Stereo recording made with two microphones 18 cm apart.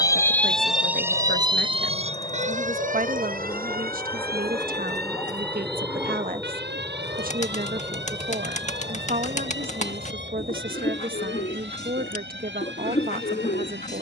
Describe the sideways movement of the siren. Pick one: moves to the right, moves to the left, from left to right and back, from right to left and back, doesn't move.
moves to the right.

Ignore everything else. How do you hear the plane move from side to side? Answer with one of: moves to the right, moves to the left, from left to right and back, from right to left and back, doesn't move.
moves to the right.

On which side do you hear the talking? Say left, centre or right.
right.